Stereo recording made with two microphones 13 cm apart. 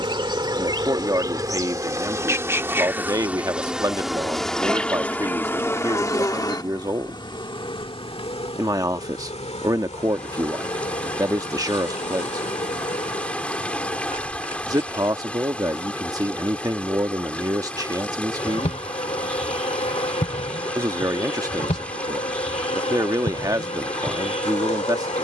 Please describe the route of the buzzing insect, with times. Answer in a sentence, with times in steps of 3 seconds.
In this clip you hear the buzzing insect on the right from 0 s, in the centre from 3 s, on the left from 6 s, not at all from 15 s and on the left from 18 s.